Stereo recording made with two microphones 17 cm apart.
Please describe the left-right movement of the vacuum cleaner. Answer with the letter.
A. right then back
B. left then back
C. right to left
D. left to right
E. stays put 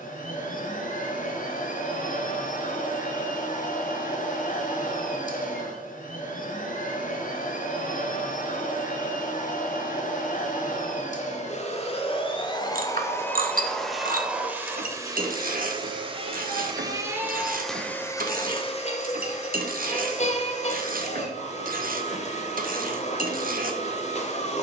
A.